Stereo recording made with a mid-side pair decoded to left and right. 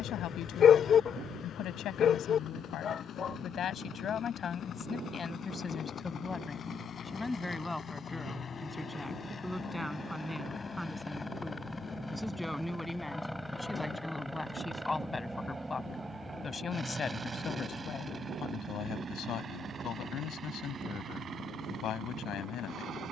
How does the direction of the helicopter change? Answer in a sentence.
In this clip you hear the helicopter travel towards the right.